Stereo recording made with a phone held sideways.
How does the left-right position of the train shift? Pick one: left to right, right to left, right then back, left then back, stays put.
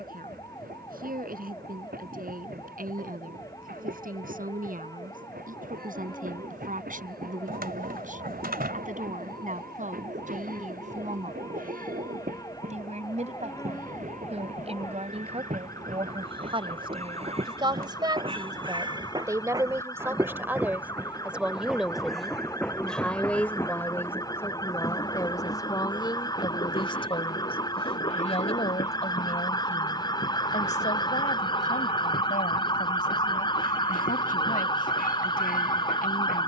right to left.